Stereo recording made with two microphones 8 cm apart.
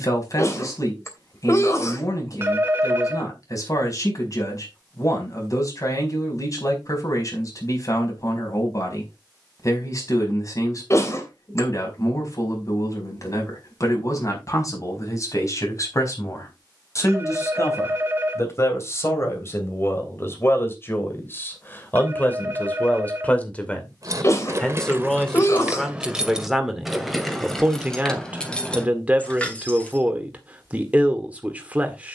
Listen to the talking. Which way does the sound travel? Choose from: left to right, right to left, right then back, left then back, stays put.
left to right.